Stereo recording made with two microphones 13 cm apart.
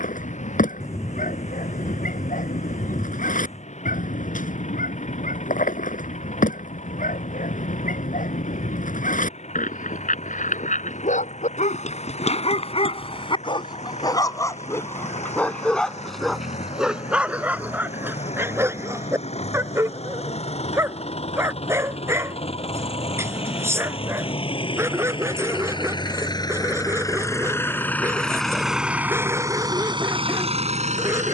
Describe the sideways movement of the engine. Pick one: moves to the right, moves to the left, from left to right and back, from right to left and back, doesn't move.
moves to the right.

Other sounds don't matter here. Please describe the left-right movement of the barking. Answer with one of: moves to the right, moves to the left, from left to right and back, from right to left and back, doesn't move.
moves to the right.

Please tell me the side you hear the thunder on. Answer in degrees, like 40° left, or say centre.
20° left.